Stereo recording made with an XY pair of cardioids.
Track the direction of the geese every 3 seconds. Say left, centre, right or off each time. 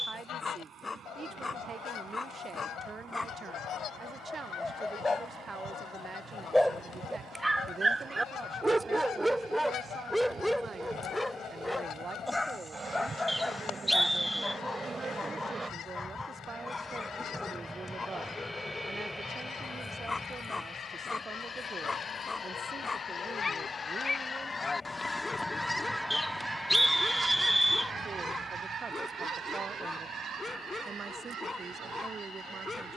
left, left, left, left, left, left, left, left, centre, right, right.